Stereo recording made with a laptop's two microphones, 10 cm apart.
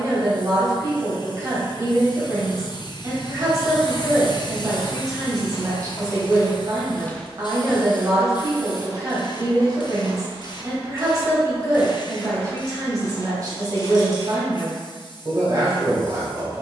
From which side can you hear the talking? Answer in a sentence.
You can hear the talking on the right.